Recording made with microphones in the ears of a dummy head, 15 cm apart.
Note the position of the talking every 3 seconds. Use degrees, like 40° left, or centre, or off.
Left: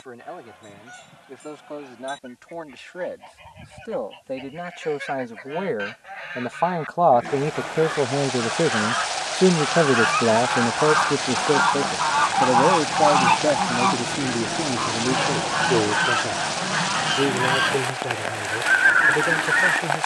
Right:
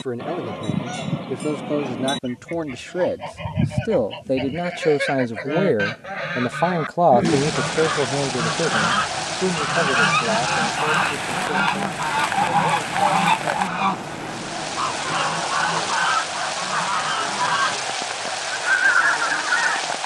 60° right, 50° right, centre, 40° left, 70° left, 80° left, 80° left.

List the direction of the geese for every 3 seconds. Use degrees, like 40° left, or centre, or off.
80° right, 80° right, 60° right, 40° right, centre, 20° left, 20° left.